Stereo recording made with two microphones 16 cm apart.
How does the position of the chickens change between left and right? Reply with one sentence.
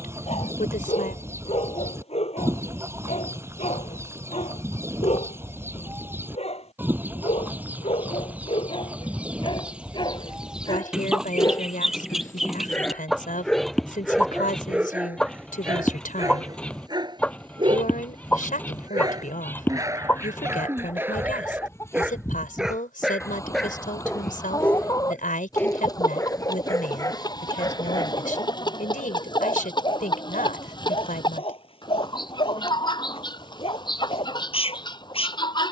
You can hear the chickens travel towards the left.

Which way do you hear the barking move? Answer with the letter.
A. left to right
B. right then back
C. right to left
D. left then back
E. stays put
B.